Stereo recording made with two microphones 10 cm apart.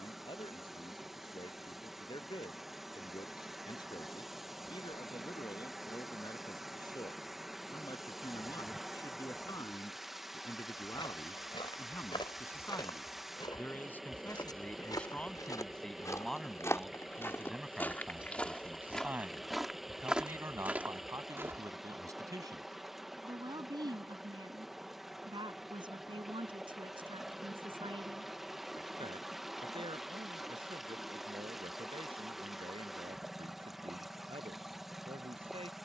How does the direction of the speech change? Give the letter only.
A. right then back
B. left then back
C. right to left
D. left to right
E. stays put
D.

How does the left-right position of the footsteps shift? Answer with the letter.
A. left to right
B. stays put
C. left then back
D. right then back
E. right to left
A.